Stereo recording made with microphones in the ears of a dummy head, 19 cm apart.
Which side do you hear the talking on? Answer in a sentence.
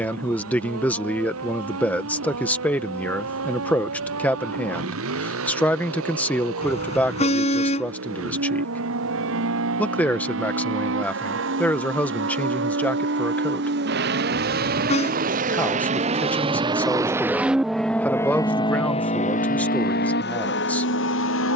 In this clip you hear the talking in the centre.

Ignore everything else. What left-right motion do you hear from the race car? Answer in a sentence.
You can hear the race car move from right to left.